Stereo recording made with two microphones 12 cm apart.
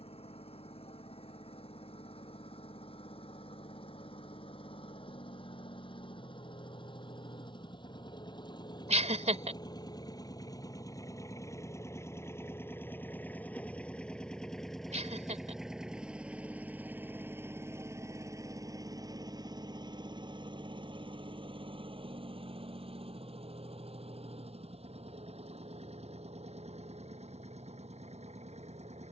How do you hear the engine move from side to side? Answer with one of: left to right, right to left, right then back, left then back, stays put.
left to right.